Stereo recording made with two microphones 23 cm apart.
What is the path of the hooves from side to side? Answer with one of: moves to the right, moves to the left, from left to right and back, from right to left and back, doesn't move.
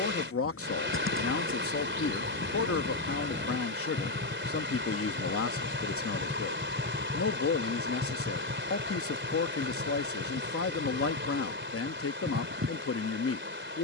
moves to the right.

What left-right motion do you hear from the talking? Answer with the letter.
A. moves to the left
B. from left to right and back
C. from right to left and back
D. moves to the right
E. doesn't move
E.